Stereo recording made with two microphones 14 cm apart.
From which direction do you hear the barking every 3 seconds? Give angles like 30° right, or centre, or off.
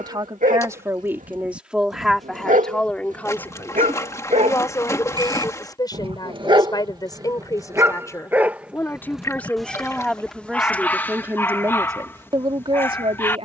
70° right, 60° right, 20° right, 10° left, 20° left.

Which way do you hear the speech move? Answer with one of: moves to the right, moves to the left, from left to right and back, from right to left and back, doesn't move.
from right to left and back.